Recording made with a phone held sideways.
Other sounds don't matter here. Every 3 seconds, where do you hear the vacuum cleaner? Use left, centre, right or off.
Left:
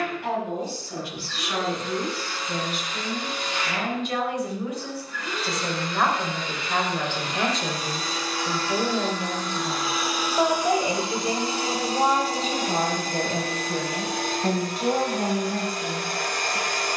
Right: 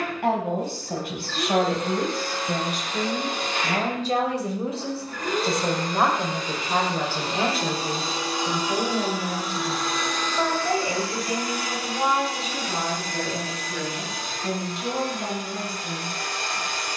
right, right, right, centre, left, left.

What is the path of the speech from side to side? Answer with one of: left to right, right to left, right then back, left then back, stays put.
right to left.